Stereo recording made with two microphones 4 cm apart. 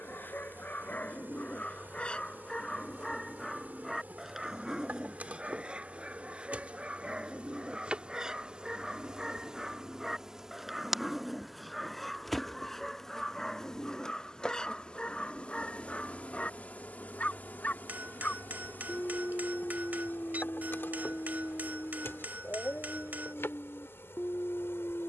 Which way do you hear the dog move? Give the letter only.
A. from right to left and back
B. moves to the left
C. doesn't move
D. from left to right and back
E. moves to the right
D.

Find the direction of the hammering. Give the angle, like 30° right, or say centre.
40° right.